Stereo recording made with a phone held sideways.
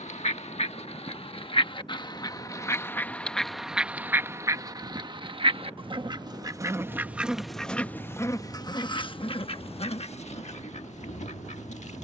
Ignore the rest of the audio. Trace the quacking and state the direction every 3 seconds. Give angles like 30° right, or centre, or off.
40° left, 20° right, centre, 50° left.